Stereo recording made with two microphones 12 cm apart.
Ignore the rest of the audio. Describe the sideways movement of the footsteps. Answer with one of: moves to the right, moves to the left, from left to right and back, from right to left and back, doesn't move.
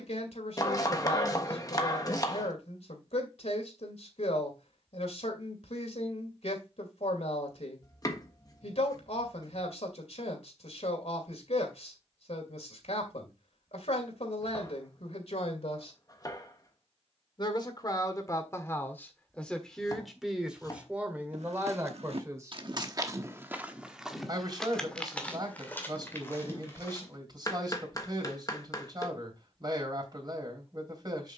moves to the left.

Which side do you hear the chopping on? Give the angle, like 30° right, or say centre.
30° left.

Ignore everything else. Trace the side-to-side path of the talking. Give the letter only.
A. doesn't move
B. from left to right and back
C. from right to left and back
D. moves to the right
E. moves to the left
D.